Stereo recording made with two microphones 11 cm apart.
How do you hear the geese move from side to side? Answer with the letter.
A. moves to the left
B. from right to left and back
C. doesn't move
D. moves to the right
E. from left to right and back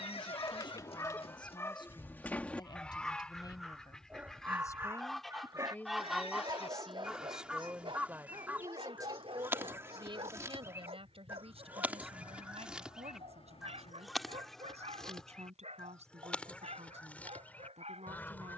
E.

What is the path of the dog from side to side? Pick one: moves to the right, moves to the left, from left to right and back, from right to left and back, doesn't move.
moves to the right.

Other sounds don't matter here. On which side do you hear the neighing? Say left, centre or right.
left.